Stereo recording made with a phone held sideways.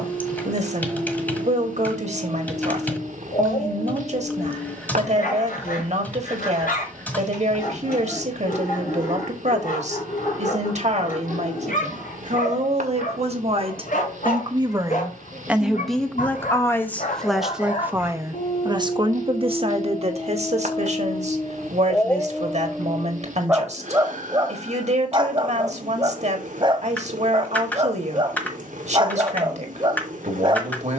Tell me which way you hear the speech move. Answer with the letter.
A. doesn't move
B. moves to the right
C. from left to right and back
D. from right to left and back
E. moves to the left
D.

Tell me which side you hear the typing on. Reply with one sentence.
You can hear the typing in the centre.